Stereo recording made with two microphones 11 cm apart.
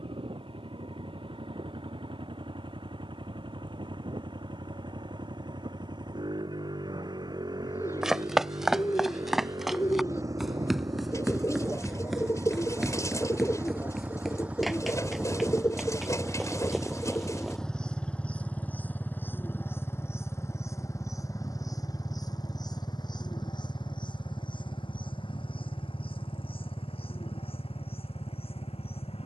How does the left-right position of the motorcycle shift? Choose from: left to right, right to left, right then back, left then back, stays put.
right to left.